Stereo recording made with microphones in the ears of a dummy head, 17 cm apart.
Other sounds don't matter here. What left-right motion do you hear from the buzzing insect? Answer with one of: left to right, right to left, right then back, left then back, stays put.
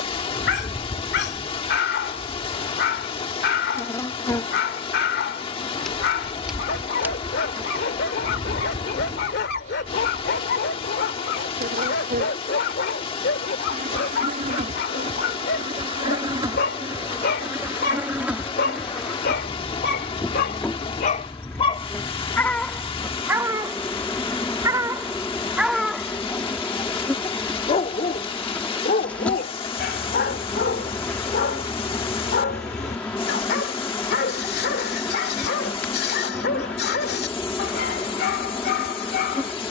right then back.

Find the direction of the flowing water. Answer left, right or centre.
left.